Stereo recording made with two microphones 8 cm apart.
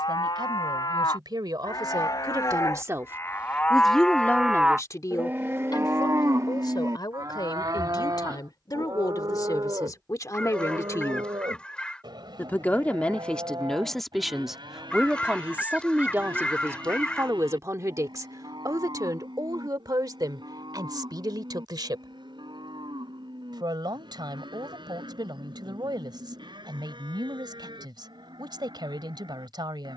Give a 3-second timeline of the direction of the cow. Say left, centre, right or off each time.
left, centre, right, right, right, right, right, right, right, right.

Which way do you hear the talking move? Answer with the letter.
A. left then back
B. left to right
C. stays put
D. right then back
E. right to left
A.